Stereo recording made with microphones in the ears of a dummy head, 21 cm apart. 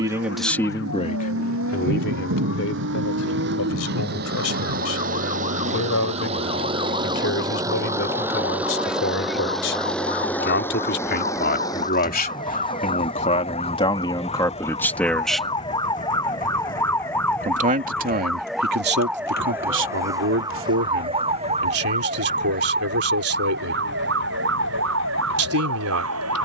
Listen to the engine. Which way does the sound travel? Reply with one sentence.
In this clip you hear the engine move to the left.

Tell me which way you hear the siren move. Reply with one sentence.
In this clip you hear the siren move from left to right.